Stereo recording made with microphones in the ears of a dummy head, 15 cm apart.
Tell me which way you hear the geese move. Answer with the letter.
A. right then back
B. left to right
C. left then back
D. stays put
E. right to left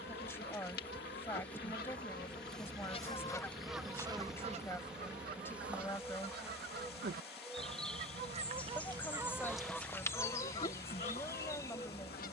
A.